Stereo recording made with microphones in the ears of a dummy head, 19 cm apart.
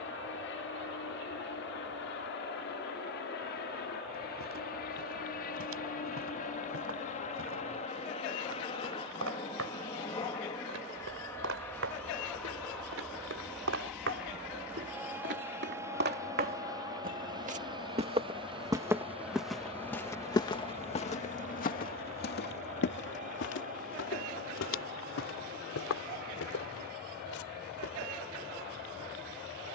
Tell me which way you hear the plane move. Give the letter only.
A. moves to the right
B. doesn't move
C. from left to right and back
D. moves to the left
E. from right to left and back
A.